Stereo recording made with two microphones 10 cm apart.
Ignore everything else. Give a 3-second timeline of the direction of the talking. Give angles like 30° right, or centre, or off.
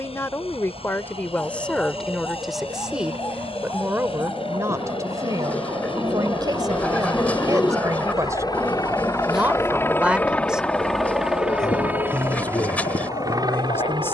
10° left, 30° right, 40° right, 10° right, 20° left.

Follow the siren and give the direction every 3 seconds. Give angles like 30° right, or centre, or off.
60° right, 60° right, 30° right, 20° left, 70° left.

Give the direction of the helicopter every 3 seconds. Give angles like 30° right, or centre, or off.
70° left, 70° left, 50° left, 10° left, 30° right.